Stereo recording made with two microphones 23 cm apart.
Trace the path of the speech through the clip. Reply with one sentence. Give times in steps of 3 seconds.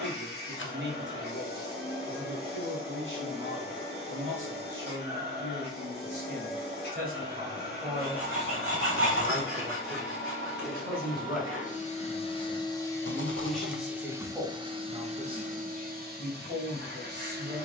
In this clip you hear the speech on the right from 0 s, in the centre from 9 s and on the right from 15 s.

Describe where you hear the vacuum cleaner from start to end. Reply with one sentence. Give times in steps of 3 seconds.
You can hear the vacuum cleaner on the left from 0 s, in the centre from 12 s and on the right from 15 s.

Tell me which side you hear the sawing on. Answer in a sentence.
You can hear the sawing on the right.